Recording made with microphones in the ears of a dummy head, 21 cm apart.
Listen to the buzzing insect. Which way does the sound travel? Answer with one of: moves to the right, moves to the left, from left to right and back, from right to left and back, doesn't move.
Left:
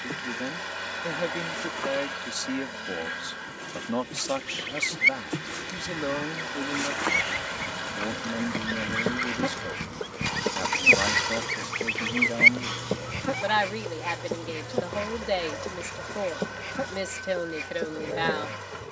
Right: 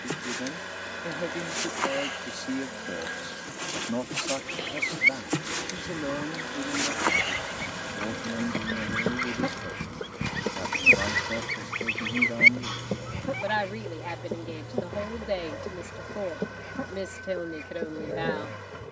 moves to the left.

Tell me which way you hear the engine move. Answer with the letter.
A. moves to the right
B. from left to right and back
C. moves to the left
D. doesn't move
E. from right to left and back
D.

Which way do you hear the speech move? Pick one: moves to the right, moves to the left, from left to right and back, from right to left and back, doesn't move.
doesn't move.